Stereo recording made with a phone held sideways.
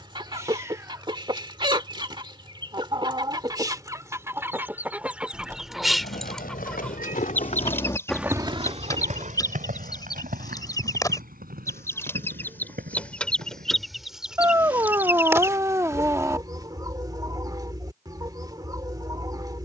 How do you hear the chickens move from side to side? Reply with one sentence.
In this clip you hear the chickens move from right to left and back again.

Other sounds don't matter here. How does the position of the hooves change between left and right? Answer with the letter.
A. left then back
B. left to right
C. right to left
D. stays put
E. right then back
B.